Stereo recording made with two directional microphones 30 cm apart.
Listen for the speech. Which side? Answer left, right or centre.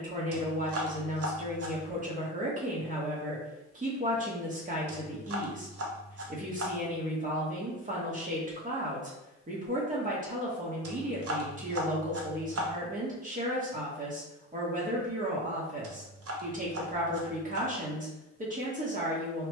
right.